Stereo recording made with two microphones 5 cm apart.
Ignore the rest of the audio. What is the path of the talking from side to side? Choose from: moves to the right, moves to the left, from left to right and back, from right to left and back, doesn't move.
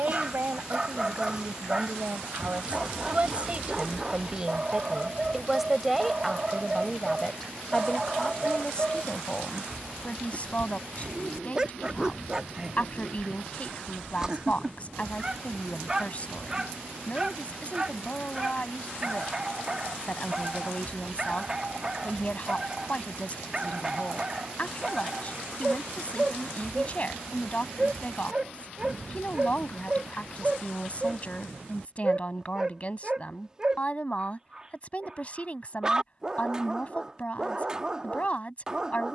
moves to the left.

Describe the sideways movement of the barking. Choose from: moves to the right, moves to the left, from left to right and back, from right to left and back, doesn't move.
doesn't move.